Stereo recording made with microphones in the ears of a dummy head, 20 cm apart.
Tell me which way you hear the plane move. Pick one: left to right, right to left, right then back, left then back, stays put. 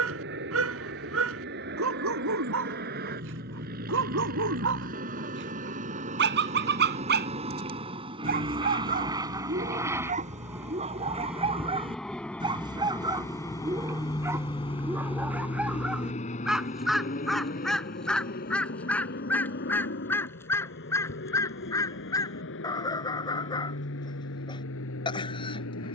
right to left.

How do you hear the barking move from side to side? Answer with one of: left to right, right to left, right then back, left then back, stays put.
right to left.